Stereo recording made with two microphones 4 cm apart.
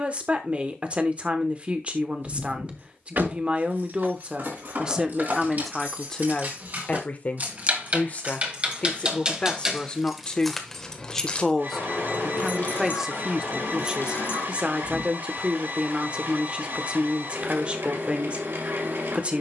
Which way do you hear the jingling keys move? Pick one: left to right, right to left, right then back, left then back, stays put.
right to left.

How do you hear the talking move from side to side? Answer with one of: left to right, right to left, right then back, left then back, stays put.
left then back.